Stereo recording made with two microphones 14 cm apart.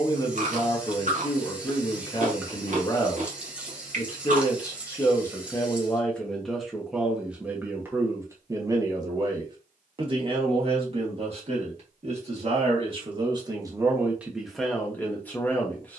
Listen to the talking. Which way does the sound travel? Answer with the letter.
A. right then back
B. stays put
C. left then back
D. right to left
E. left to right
A.